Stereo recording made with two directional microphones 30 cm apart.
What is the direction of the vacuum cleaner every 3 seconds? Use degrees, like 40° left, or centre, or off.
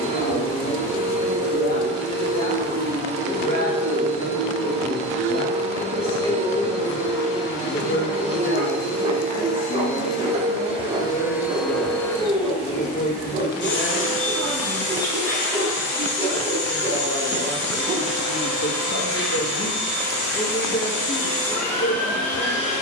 20° right, 20° right, 20° right, 10° right, 40° left, 60° left, 60° left, 60° left.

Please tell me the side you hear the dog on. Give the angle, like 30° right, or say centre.
20° right.